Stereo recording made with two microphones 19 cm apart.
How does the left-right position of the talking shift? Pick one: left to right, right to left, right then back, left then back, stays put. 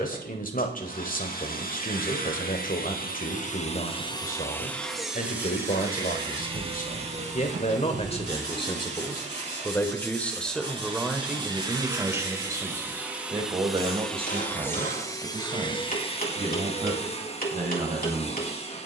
left to right.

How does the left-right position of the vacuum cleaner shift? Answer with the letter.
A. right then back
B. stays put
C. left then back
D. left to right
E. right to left
A.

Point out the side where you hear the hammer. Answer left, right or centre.
left.